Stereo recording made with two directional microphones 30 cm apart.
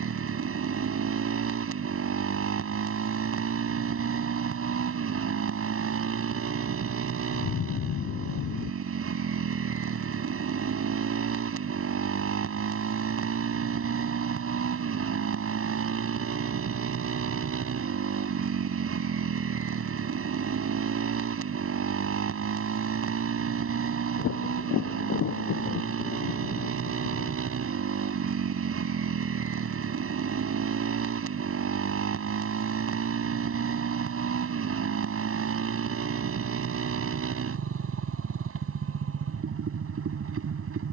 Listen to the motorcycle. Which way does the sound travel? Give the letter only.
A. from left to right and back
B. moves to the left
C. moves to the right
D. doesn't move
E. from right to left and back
D.